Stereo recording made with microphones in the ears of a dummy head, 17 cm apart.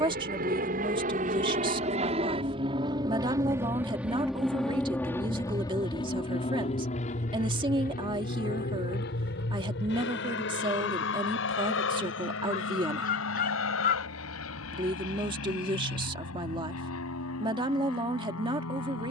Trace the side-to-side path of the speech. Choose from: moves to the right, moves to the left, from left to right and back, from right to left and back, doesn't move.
doesn't move.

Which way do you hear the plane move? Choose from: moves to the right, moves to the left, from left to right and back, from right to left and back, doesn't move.
moves to the left.